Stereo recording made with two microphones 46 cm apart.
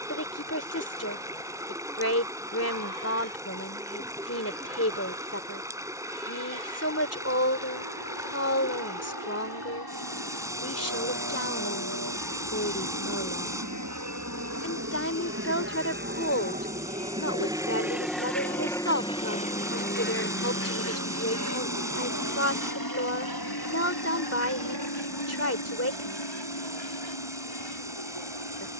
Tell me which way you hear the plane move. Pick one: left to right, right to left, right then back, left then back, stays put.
right to left.